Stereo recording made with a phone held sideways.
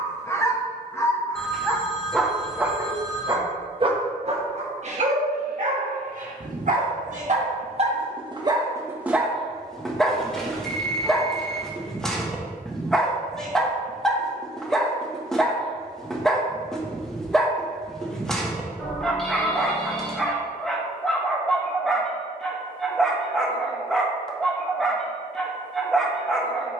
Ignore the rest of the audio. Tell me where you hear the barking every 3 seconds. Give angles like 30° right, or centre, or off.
10° left, 50° right, 40° right, centre, centre, centre, centre, centre, centre.